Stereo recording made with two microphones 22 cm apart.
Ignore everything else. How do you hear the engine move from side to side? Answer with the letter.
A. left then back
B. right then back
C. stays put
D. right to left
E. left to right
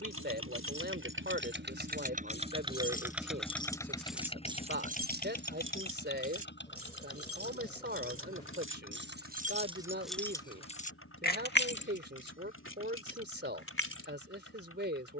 D.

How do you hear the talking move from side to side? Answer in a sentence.
In this clip you hear the talking stay put.